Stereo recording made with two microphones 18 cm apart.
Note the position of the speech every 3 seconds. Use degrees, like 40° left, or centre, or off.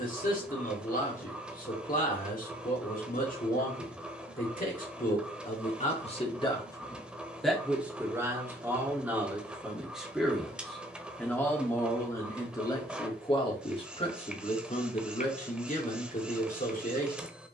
50° left, 50° left, centre, centre, 30° left, 50° left.